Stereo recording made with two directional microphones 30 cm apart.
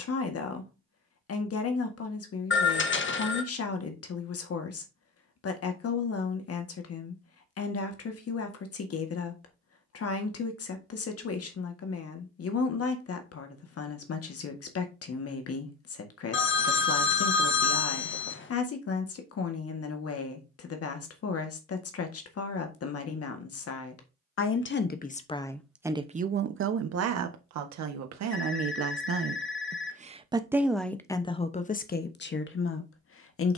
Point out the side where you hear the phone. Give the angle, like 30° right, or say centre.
40° left.